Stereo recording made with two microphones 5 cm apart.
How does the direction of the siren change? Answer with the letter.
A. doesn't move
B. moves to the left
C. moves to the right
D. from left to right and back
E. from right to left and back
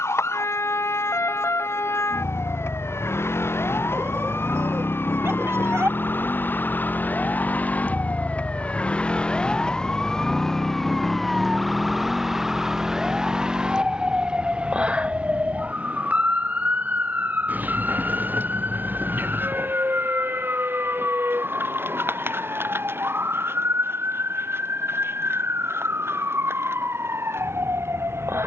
C.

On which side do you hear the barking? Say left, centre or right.
right.